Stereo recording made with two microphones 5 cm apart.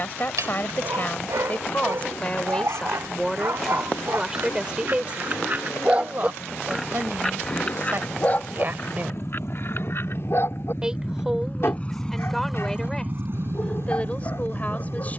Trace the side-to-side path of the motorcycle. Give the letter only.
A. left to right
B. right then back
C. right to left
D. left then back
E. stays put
A.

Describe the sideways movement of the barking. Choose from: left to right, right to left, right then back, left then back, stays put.
right to left.